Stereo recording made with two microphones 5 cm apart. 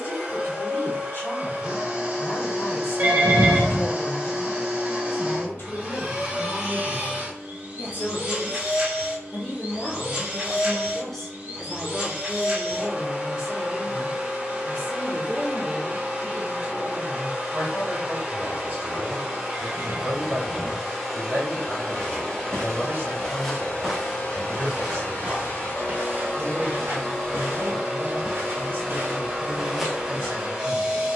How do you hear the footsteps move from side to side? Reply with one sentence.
You can hear the footsteps move from left to right and back again.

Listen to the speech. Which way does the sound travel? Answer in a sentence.
You can hear the speech travel towards the right.